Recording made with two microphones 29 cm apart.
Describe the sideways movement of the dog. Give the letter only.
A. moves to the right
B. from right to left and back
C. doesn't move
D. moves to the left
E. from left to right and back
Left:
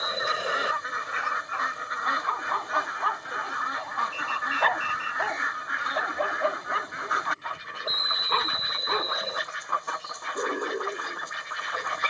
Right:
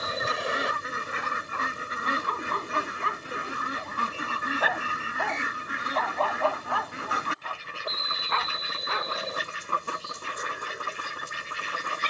D.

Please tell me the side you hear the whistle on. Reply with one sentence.
In this clip you hear the whistle in the centre.